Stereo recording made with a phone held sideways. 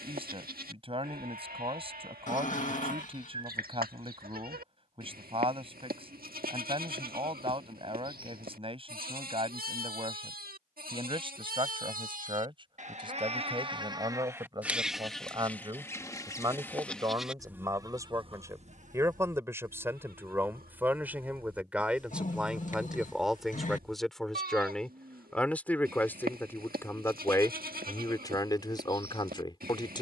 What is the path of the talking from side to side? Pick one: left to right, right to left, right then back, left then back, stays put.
right to left.